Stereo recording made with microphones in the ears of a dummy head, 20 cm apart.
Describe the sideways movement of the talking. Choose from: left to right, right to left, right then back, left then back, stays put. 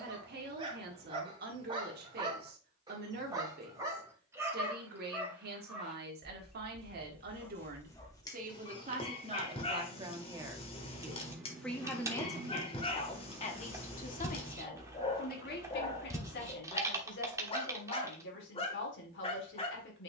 right to left.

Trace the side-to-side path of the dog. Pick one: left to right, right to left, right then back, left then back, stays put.
right to left.